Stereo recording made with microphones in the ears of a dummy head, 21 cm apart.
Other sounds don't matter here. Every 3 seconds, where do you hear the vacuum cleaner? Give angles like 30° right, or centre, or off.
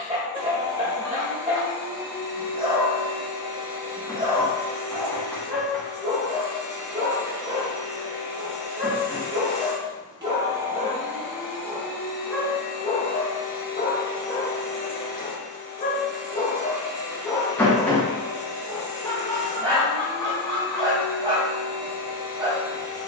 20° right, 20° right, 20° right, 10° right, 30° left, centre, 20° right, 20° right.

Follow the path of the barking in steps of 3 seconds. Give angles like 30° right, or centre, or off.
30° right, 30° right, 30° right, 30° right, 30° left, 20° left, 20° right, 20° right.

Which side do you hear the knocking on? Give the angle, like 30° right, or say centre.
10° left.